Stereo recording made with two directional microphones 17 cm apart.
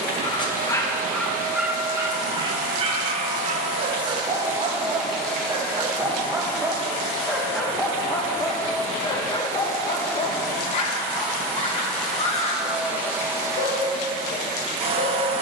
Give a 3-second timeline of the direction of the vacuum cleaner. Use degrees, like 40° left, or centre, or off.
50° right, 20° right, 20° left, 10° left, 20° right.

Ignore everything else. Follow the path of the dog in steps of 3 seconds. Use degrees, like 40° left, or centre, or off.
centre, 30° right, centre, 30° left, 40° left.